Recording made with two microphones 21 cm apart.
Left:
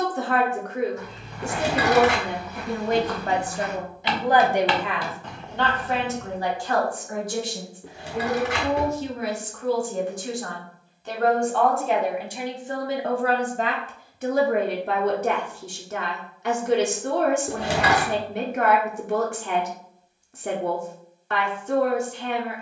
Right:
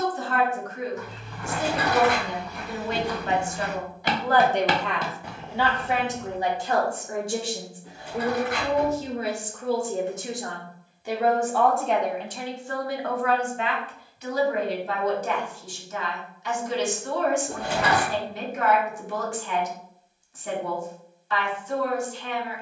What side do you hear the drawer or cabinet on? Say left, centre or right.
left.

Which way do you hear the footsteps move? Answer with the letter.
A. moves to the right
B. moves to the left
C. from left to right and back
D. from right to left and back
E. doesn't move
C.